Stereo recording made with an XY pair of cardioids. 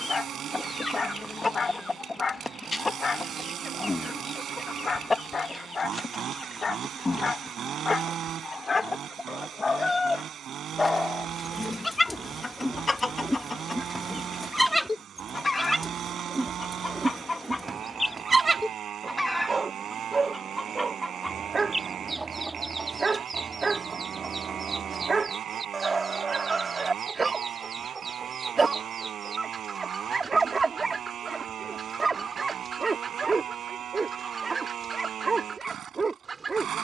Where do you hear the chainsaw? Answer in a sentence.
You can hear the chainsaw on the right.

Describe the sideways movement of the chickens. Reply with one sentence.
You can hear the chickens move from left to right.